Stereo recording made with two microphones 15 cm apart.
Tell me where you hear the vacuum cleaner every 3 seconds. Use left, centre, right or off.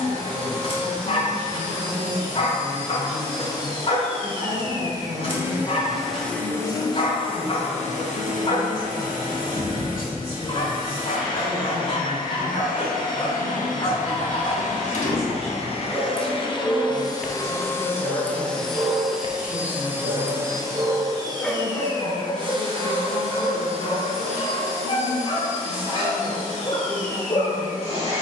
right, right, left, left, left, left, centre, right, right, right.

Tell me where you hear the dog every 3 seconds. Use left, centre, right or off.
left, left, left, left, left, centre, right, left, left, left.